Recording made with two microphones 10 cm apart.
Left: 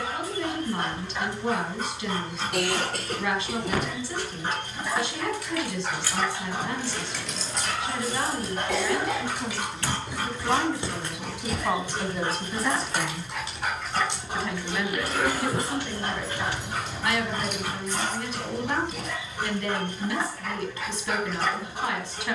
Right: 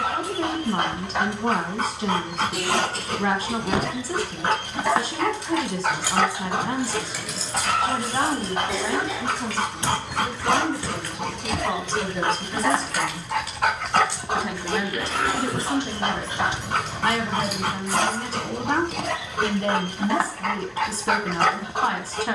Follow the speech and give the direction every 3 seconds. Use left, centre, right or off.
right, right, right, centre, centre, right, right, right.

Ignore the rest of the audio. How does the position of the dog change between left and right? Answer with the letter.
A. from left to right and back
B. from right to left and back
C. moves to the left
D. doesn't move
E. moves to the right
D.